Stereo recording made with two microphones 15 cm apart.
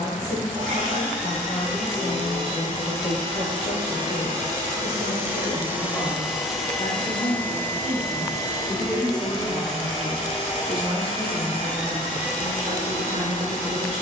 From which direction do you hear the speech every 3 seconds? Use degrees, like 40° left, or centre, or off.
60° left, 50° left, 30° left, 20° right, 60° right.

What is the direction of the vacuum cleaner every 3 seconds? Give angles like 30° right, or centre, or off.
50° right, 30° right, 10° left, 50° left, 60° left.